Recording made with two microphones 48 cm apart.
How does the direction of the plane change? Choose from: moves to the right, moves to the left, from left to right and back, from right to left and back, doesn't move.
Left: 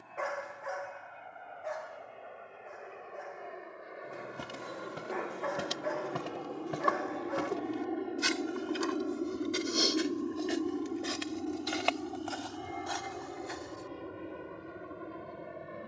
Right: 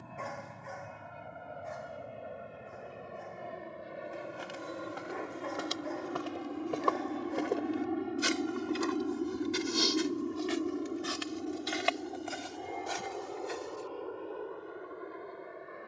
moves to the left.